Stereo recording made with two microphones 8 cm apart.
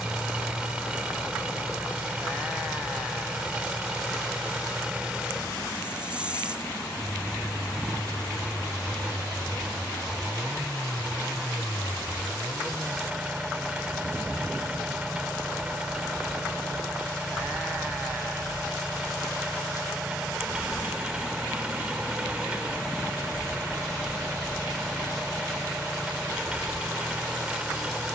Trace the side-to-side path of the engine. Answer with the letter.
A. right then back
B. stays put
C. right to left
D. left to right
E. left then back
B.